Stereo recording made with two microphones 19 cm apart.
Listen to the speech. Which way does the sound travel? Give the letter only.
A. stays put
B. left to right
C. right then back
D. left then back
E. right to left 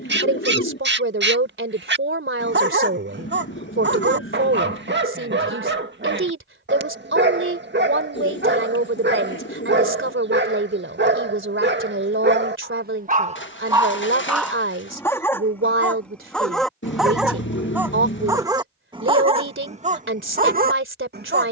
A.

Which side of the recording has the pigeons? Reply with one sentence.
In this clip you hear the pigeons on the left.